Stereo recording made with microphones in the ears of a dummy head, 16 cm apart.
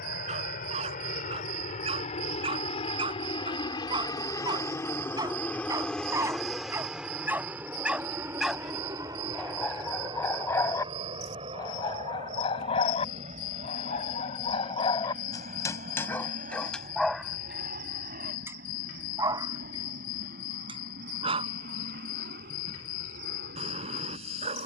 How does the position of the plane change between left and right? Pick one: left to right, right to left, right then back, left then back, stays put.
left to right.